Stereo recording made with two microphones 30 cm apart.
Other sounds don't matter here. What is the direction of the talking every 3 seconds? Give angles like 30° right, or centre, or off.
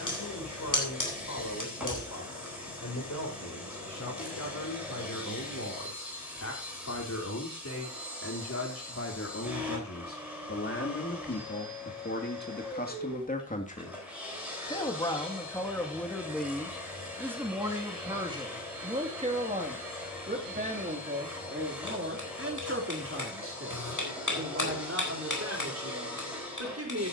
70° left, 70° left, 60° left, 50° left, 30° left, centre, 20° right, 40° right, 50° right.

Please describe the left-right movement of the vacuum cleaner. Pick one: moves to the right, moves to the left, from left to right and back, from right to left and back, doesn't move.
doesn't move.